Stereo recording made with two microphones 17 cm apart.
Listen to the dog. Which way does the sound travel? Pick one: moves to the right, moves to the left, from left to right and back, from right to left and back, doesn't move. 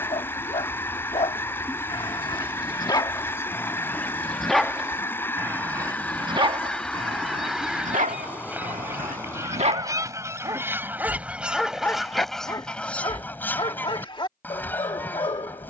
from left to right and back.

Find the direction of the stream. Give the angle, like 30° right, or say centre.
10° left.